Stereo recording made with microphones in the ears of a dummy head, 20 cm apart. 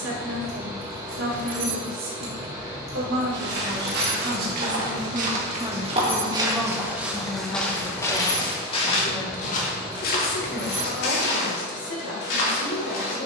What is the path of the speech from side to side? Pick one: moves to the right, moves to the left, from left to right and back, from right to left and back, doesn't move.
moves to the left.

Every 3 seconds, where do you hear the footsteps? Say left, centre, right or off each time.
off, right, centre, left, left.